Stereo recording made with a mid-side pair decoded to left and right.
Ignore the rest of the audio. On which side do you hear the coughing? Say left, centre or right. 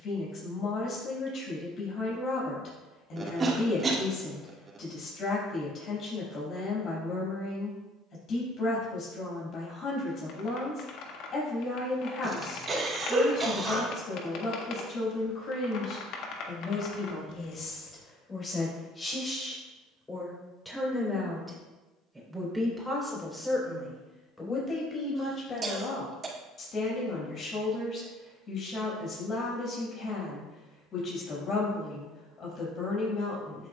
right.